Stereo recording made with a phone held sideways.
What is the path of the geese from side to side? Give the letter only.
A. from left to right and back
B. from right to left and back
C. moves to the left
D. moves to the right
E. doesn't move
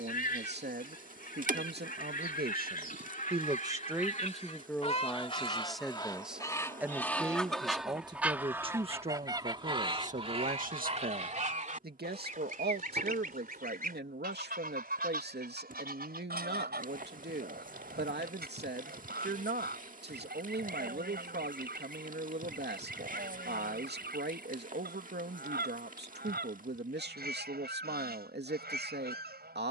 D.